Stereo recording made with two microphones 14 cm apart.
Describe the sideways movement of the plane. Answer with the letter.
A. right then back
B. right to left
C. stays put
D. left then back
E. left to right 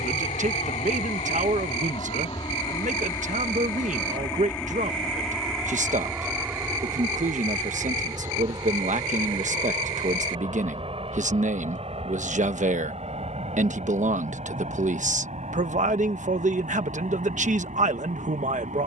E.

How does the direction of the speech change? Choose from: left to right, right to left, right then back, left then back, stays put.
stays put.